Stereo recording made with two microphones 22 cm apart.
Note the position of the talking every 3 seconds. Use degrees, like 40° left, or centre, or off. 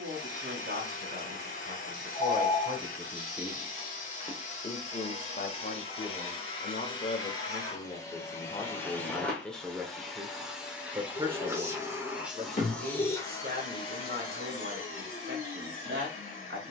40° right, 20° left, 30° left, 10° right, 40° right, 50° right.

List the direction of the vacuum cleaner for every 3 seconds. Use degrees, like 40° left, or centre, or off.
40° left, 30° left, 20° left, centre, 20° left, 40° left.